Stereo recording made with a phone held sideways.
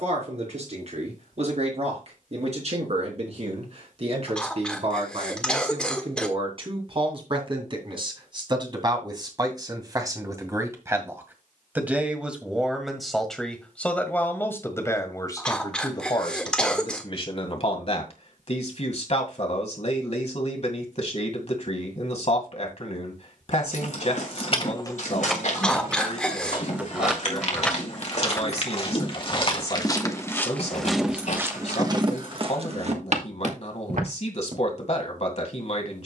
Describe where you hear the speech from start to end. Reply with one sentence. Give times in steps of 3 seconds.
You can hear the speech on the right from 0 s, in the centre from 12 s and on the left from 15 s.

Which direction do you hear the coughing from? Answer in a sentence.
You can hear the coughing in the centre.